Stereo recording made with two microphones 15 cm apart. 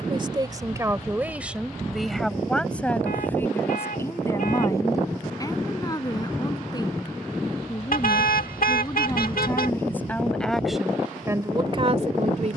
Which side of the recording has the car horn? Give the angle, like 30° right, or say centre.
80° left.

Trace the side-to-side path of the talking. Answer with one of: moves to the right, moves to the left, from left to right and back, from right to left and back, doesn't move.
from right to left and back.